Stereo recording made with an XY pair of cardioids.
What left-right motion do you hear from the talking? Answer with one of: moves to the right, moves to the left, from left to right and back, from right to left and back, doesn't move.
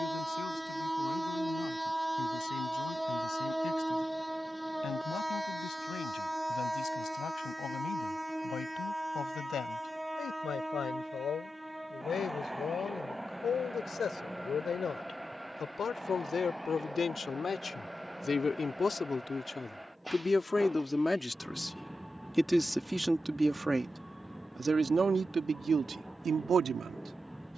moves to the right.